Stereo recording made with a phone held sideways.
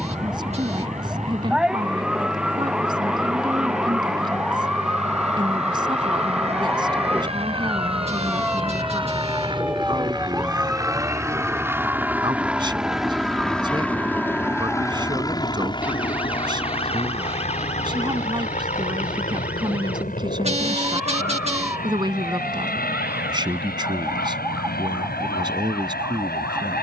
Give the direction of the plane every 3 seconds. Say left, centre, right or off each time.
right, right, right, right, centre, left, left, left, left.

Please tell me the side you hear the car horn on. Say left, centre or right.
right.